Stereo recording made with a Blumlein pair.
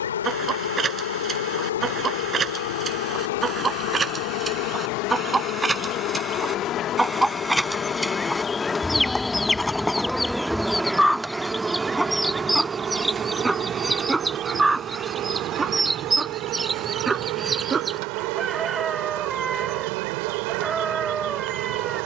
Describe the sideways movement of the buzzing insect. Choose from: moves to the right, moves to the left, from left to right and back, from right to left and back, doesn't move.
moves to the right.